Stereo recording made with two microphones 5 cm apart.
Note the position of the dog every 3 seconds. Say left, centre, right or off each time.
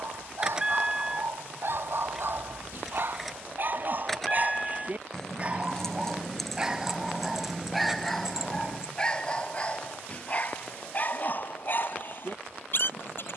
right, right, centre, left, left.